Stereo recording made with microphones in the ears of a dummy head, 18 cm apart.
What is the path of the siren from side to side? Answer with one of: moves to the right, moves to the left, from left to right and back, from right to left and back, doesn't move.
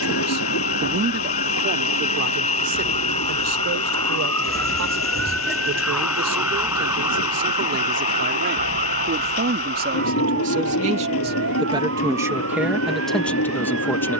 moves to the right.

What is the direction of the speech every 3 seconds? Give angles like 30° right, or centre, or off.
50° right, 70° right, 60° right, 40° right, centre.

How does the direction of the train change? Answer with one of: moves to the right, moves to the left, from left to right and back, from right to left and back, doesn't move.
doesn't move.